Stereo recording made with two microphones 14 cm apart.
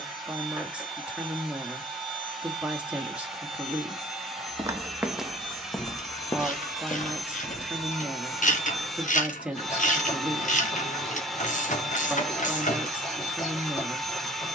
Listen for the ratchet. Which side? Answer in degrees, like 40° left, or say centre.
70° left.